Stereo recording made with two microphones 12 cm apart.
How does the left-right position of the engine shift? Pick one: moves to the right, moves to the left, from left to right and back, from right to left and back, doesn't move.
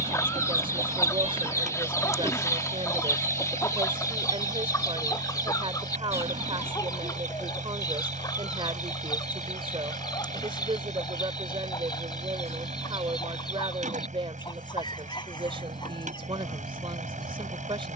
doesn't move.